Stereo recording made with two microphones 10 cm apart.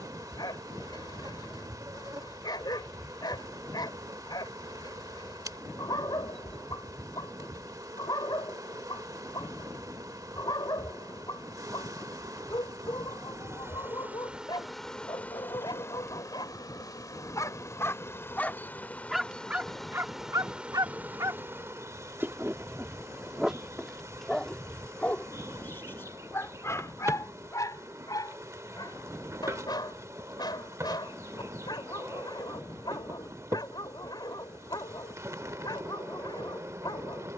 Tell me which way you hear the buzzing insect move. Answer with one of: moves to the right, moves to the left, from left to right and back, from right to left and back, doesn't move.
from right to left and back.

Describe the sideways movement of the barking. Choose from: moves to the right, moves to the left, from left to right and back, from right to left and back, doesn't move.
from left to right and back.